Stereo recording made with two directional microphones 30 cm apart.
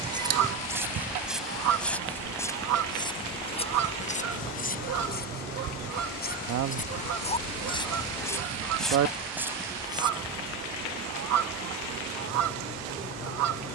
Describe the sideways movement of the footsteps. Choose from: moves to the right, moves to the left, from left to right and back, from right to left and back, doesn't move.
from right to left and back.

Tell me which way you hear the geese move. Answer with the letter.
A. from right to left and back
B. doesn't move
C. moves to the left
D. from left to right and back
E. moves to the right
B.